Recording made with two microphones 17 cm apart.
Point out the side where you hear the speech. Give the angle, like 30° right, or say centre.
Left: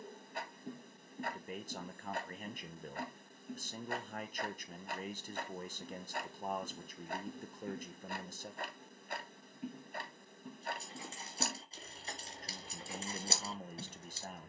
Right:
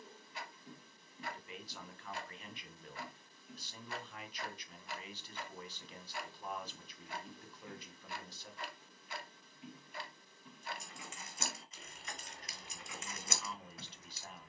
50° left.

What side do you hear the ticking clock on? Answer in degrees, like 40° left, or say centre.
50° left.